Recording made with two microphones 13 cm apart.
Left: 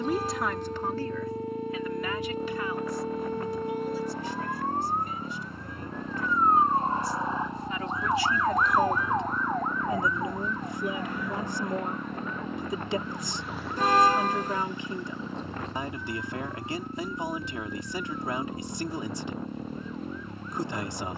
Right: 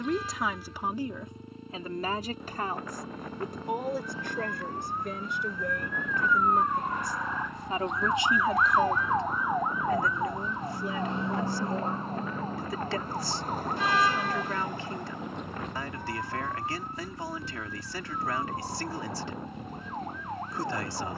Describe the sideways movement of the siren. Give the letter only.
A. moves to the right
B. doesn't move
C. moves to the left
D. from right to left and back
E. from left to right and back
A.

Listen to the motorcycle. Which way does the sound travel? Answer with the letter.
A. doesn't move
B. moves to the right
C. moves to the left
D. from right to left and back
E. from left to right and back
A.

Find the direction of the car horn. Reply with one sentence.
You can hear the car horn on the left.